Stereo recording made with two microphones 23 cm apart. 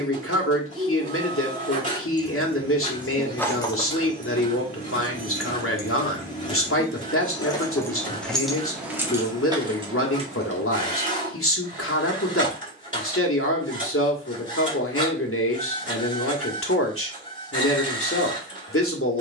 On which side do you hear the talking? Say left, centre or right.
left.